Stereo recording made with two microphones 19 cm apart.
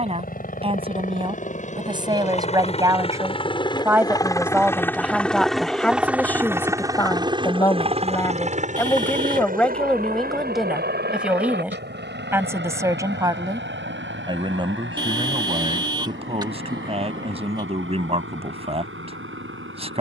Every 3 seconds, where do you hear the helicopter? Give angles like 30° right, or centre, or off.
40° left, 10° left, 20° right, 50° right, 70° right, 70° right, 80° right.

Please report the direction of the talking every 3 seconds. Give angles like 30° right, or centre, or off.
30° right, 10° right, 10° left, centre, 20° right, 30° right, 30° right.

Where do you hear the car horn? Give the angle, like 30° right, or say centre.
20° right.